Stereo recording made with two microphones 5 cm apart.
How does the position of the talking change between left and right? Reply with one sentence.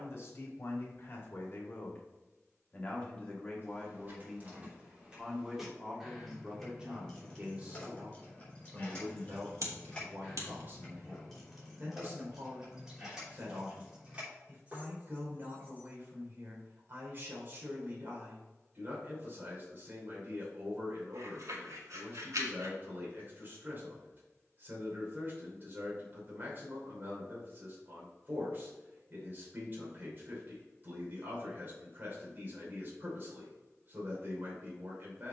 You can hear the talking go from the left side to the right.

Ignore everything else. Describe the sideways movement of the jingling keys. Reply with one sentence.
In this clip you hear the jingling keys move from right to left and back again.